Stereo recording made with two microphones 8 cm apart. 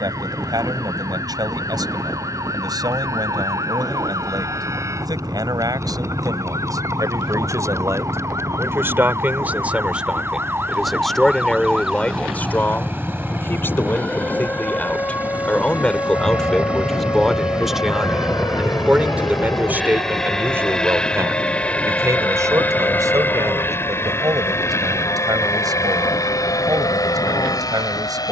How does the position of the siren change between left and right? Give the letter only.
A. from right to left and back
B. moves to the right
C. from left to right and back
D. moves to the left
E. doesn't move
D.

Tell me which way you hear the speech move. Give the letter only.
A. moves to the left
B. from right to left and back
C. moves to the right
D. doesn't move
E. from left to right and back
B.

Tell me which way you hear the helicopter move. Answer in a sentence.
In this clip you hear the helicopter go from the right side to the left.